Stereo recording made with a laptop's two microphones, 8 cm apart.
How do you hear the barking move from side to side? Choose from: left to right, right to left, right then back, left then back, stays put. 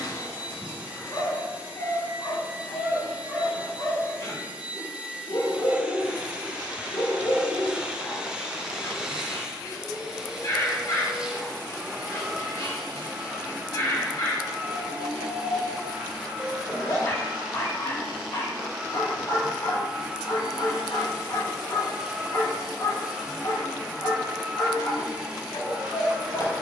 stays put.